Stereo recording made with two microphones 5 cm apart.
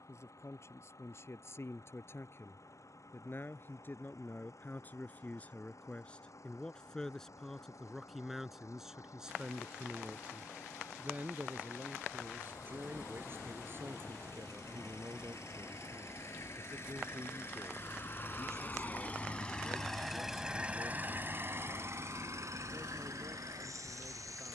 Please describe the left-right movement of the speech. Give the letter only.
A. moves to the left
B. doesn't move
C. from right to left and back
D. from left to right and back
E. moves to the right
E.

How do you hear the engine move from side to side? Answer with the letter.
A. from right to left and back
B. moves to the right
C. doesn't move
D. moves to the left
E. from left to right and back
B.